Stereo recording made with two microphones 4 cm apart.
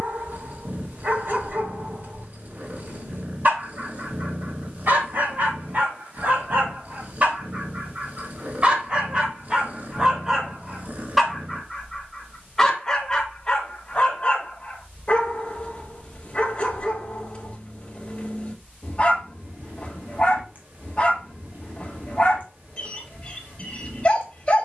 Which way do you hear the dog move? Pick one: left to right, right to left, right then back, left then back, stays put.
right to left.